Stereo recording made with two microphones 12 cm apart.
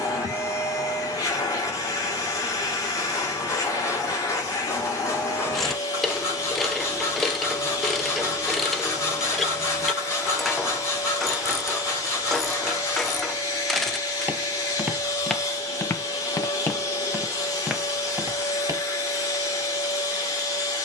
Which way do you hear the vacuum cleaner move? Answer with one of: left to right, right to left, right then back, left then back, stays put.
stays put.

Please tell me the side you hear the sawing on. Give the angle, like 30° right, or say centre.
20° left.